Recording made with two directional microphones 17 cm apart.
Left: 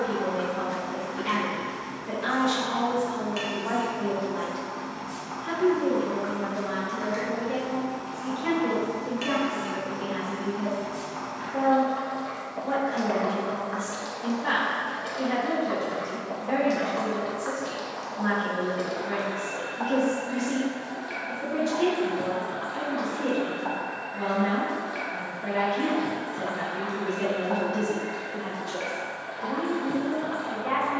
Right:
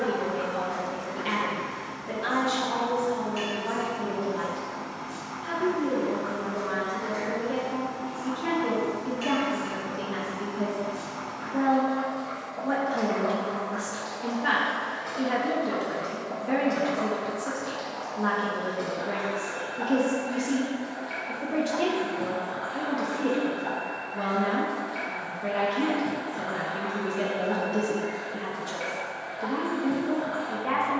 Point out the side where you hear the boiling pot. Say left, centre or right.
left.